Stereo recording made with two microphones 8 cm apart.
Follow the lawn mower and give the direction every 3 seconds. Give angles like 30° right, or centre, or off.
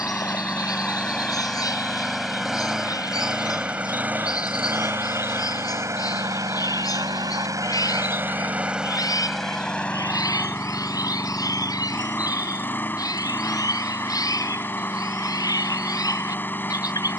10° left, 20° right, 40° right, 20° left, 20° left, 20° left.